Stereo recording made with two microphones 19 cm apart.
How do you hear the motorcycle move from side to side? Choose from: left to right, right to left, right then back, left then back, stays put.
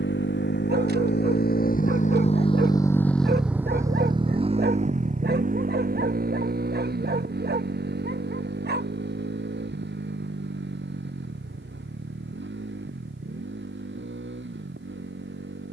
left to right.